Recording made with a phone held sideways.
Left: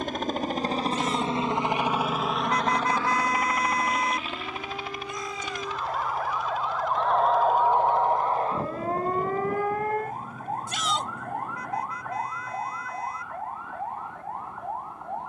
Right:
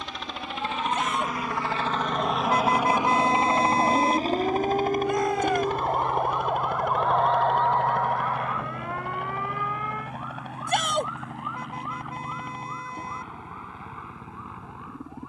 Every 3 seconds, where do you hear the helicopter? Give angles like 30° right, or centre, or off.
20° left, 40° right, 60° right, 70° right, 70° right.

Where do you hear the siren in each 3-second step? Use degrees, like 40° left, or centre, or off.
70° right, 50° right, 10° left, 50° left, 70° left.